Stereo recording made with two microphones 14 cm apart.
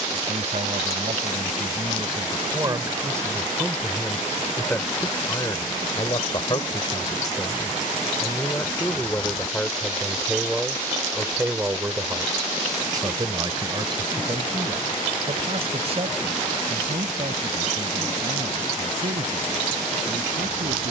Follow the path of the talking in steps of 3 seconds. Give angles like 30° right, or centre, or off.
40° right, 10° left, 30° left, centre, 30° right, 50° right, 60° right.